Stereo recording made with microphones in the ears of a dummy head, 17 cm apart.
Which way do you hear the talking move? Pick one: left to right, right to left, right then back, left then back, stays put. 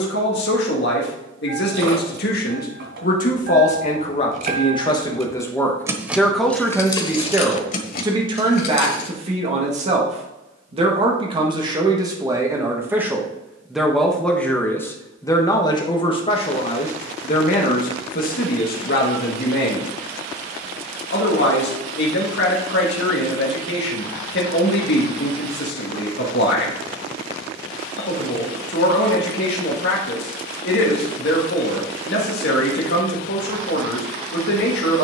right then back.